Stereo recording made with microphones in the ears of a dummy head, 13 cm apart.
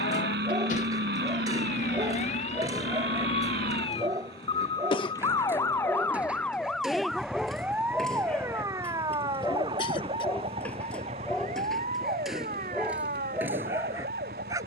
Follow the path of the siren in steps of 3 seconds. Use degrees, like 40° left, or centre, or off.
50° left, 30° left, 10° right, 40° right, 50° right.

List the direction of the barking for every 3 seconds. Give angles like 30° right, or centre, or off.
20° right, 20° right, centre, 10° left, 10° right.